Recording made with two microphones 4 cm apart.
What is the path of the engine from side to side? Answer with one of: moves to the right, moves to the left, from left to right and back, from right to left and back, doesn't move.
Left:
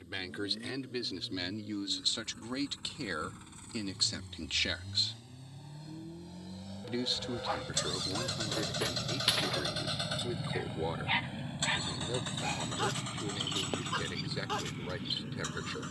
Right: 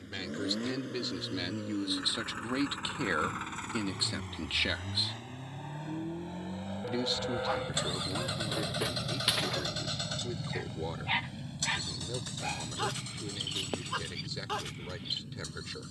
moves to the left.